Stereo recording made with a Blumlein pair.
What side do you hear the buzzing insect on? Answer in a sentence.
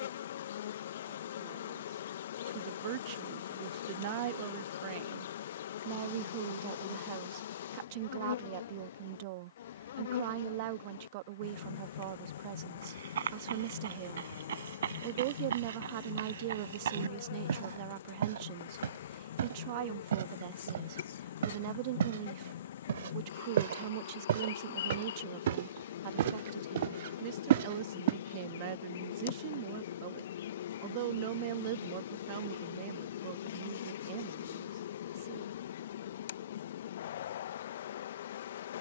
In this clip you hear the buzzing insect on the left.